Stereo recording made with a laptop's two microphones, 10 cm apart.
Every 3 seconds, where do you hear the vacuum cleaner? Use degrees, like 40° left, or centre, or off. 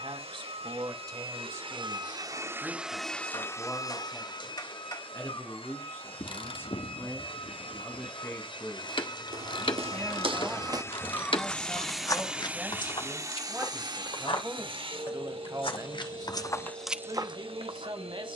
50° right, 40° left, 60° left, 30° left, 30° right, 70° right.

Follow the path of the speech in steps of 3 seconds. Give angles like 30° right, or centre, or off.
30° right, 20° left, 20° left, centre, 10° right, 40° right.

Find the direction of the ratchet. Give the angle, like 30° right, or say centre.
50° left.